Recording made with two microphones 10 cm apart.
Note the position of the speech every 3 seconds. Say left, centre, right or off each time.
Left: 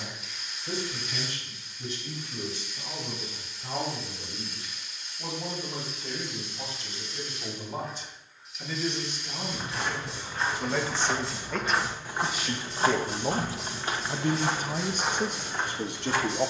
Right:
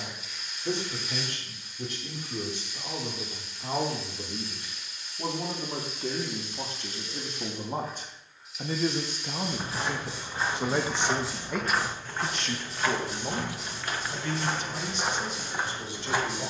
right, right, right, right, left, left.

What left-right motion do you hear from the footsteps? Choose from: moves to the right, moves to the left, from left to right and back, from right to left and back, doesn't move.
from right to left and back.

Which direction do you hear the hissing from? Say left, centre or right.
centre.